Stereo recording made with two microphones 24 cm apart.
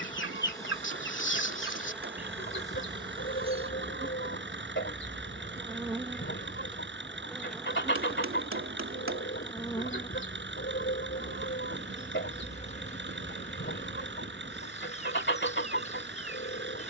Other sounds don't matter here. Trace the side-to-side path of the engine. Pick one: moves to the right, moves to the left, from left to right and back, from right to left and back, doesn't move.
doesn't move.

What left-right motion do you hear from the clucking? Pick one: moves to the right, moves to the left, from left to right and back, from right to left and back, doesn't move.
doesn't move.